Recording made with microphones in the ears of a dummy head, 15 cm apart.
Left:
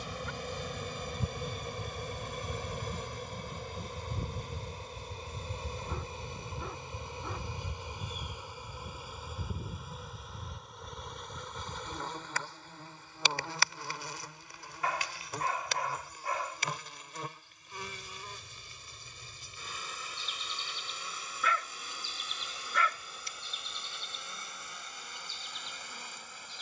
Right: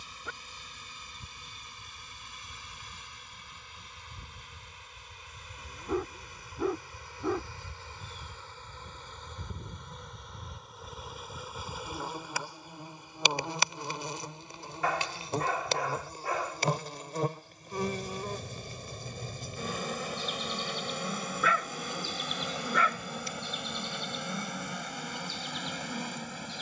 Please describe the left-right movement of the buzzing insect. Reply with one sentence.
You can hear the buzzing insect move from left to right.